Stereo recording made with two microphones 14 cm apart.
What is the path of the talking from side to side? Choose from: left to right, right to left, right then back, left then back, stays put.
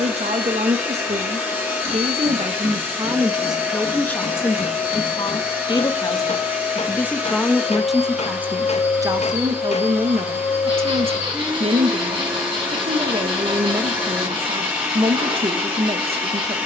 left then back.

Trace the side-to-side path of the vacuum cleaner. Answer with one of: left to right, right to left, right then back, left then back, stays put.
stays put.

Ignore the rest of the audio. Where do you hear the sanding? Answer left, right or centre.
right.